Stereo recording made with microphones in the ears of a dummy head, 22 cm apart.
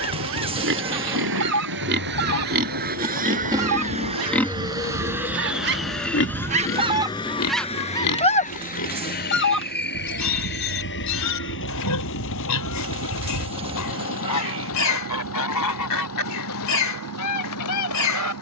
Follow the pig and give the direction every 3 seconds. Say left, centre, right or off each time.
right, centre, left, left, left, left.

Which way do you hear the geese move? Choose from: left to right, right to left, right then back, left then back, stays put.
right to left.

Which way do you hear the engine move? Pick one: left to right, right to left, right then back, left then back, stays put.
right to left.